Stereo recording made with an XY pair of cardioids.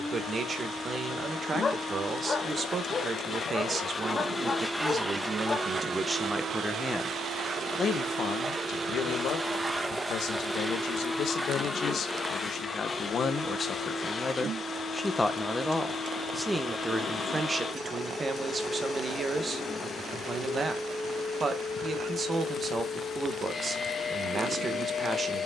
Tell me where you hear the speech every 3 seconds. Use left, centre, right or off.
right, right, left, left, left, centre, right, right, right.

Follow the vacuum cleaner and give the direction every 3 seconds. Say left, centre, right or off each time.
left, centre, right, centre, left, left, left, left, left.